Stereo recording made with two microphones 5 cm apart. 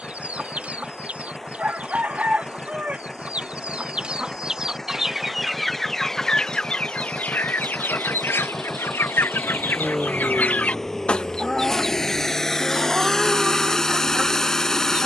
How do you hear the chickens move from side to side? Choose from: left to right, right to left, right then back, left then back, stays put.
left then back.